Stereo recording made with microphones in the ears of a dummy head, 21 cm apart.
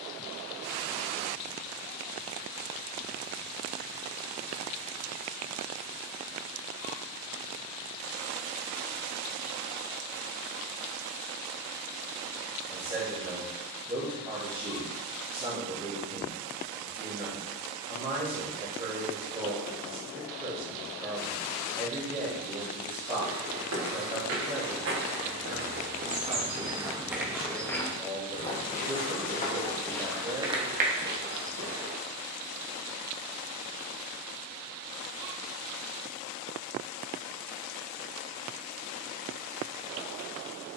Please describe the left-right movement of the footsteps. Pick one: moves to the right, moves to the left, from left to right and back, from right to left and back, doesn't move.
from right to left and back.